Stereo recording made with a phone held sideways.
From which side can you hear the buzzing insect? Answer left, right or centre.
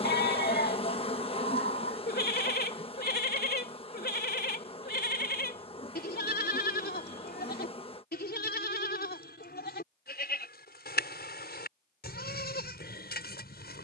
left.